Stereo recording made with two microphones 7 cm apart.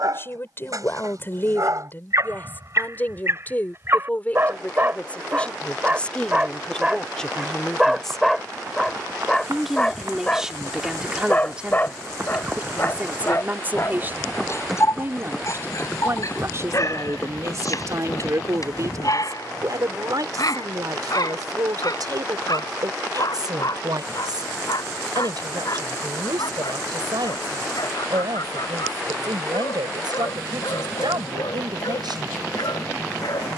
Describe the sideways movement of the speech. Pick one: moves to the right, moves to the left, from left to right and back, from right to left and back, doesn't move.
moves to the right.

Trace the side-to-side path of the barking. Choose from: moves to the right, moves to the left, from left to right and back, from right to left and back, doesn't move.
moves to the left.